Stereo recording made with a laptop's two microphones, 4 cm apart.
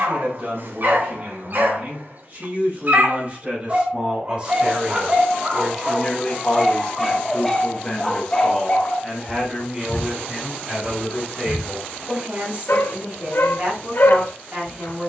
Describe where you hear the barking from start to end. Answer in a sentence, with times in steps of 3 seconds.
In this clip you hear the barking on the right from 0 s, in the centre from 6 s and on the left from 9 s.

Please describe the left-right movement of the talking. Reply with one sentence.
You can hear the talking move from right to left and back again.